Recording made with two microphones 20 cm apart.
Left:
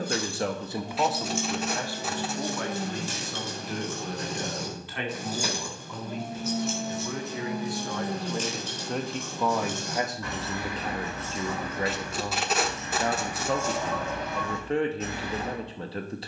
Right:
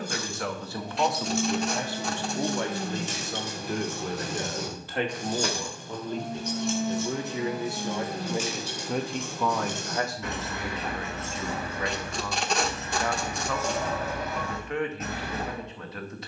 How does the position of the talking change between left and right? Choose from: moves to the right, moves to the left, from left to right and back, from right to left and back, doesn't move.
from left to right and back.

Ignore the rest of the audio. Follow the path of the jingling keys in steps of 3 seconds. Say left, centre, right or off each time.
right, centre, centre, right, right, right.